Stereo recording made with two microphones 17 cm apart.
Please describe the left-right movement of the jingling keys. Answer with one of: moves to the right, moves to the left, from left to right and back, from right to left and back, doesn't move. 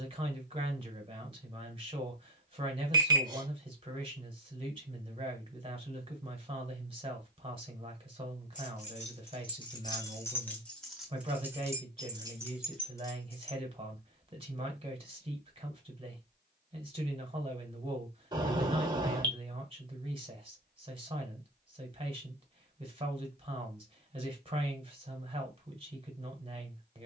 from left to right and back.